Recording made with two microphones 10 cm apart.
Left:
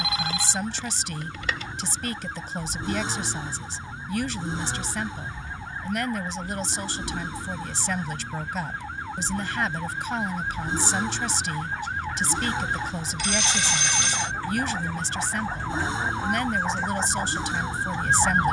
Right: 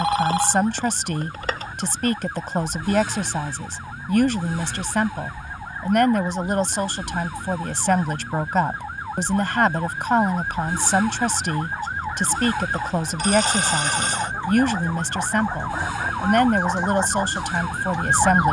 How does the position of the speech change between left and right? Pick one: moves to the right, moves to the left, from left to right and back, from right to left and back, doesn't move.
doesn't move.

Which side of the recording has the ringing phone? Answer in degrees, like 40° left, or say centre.
40° right.